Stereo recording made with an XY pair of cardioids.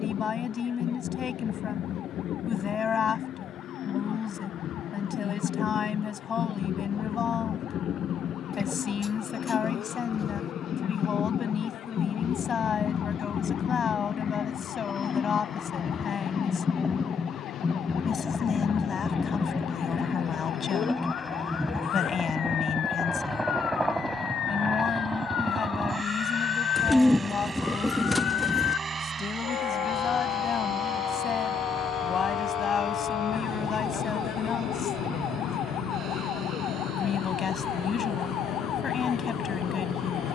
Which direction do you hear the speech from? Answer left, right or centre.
left.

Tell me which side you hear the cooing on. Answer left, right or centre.
centre.